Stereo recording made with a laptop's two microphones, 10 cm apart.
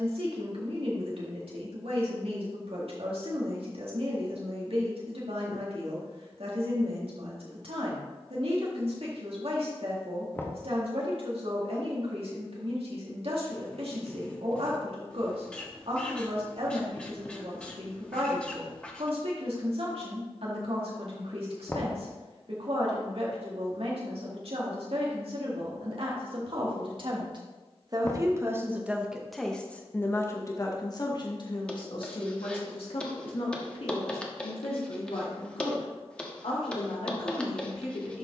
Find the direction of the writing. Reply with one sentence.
In this clip you hear the writing in the centre.